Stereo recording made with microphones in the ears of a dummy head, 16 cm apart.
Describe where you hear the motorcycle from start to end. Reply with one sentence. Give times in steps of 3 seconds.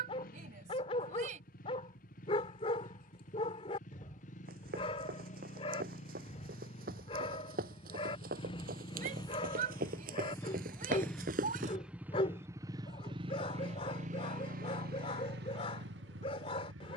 You can hear the motorcycle on the left from 0 s, in the centre from 9 s and on the right from 12 s.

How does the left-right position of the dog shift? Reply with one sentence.
You can hear the dog stay put.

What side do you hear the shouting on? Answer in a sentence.
You can hear the shouting on the right.